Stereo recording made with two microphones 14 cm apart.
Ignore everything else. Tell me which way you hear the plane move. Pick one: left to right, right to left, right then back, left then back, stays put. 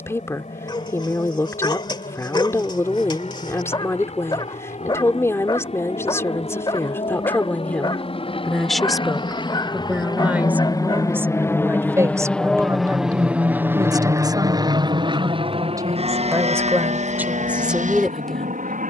left to right.